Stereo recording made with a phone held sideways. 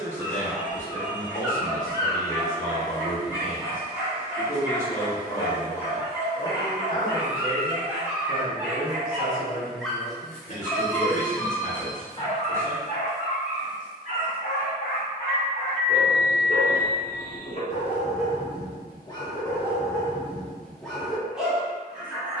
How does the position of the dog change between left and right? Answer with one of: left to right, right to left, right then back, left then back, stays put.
left then back.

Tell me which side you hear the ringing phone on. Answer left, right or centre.
left.